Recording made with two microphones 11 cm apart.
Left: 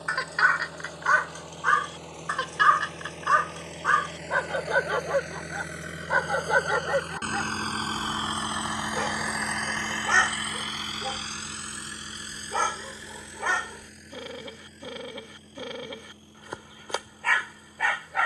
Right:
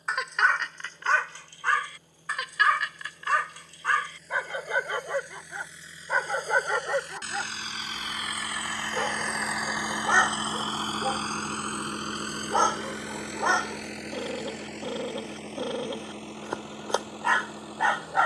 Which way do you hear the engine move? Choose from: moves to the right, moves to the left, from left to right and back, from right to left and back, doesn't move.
moves to the right.